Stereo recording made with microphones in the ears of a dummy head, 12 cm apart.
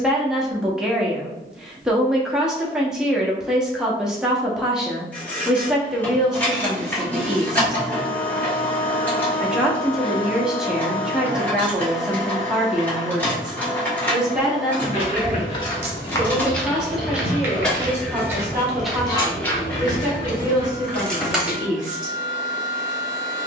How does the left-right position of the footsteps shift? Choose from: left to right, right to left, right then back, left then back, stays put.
right then back.